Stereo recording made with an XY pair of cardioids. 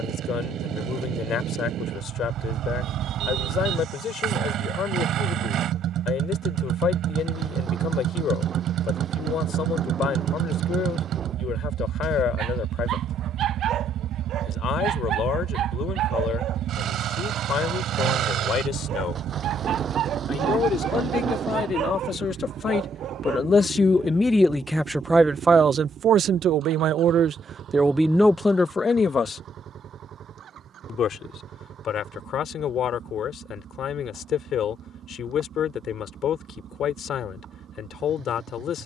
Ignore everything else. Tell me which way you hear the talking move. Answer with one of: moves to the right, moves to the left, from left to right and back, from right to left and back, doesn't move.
from left to right and back.